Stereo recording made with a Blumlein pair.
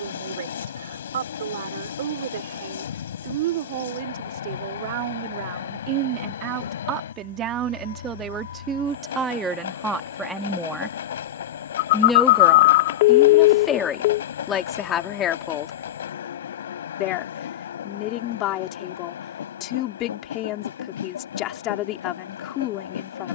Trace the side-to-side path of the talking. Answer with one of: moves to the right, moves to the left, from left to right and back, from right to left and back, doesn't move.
moves to the left.